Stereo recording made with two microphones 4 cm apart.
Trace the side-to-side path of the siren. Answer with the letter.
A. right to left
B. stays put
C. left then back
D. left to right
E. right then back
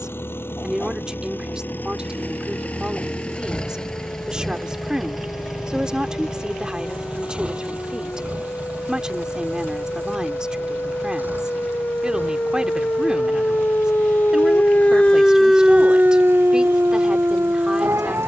D.